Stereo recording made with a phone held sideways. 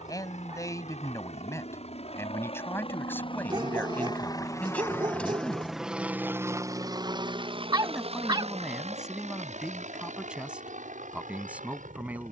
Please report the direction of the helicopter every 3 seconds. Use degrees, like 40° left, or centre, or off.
60° left, 20° left, 40° right, 70° right.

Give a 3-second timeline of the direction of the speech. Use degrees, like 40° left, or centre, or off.
20° left, 10° left, centre, 10° right.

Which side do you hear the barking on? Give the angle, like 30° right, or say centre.
40° right.